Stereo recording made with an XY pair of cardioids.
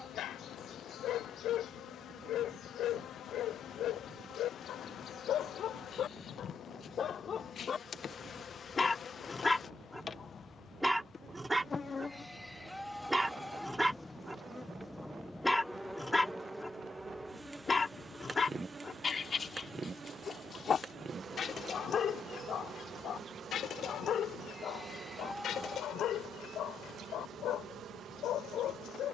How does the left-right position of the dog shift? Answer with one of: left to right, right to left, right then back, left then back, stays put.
right then back.